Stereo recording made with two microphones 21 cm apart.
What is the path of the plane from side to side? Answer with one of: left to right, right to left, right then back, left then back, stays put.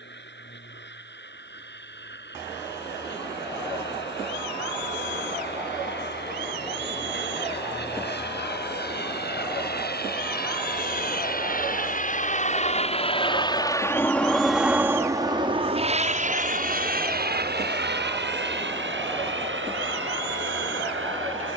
left to right.